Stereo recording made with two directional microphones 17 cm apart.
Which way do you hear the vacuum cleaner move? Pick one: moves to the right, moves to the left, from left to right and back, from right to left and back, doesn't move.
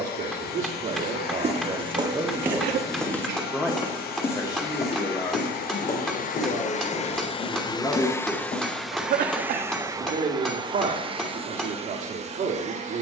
moves to the right.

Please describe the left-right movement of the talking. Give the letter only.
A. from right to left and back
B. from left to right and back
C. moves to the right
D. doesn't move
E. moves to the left
A.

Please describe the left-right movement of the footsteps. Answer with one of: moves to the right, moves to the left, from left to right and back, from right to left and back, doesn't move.
moves to the left.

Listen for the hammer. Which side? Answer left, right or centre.
centre.